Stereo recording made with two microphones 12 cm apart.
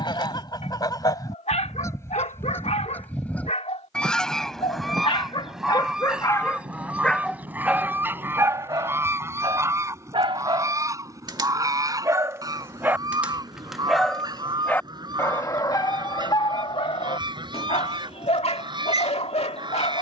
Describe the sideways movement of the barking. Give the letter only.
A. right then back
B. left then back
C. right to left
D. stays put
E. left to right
A.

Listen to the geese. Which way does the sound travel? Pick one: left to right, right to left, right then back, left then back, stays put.
left to right.